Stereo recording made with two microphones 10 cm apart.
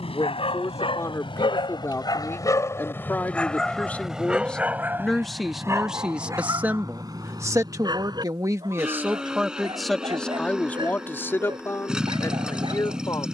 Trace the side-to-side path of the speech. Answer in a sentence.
In this clip you hear the speech move from left to right and back again.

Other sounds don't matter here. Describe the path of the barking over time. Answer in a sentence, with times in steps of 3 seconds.
You can hear the barking on the left from 0 s, in the centre from 3 s and on the right from 6 s.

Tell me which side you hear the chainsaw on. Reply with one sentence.
You can hear the chainsaw in the centre.